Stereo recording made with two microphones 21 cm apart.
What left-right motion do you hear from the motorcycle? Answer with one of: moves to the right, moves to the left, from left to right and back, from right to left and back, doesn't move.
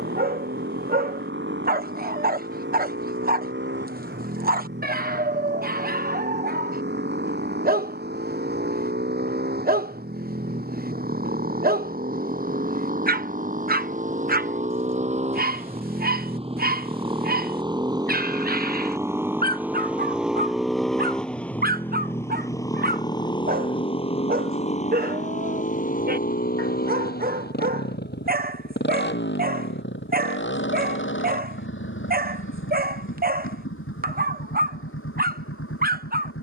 moves to the left.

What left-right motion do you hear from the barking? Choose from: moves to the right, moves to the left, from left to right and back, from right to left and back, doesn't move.
doesn't move.